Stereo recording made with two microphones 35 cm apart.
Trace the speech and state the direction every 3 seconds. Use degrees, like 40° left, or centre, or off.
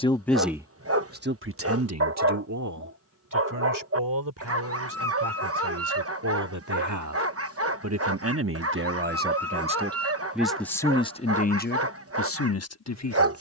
30° right, 60° right, 50° right, centre, 50° left.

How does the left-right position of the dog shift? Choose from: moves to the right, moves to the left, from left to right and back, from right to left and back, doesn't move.
doesn't move.